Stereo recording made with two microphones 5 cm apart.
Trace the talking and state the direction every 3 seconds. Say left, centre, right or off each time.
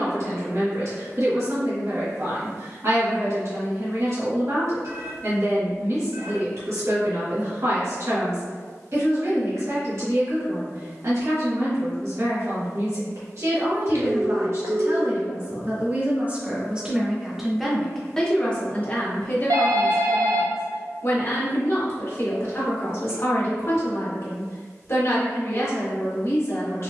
right, right, right, right, right, right, left, left, left.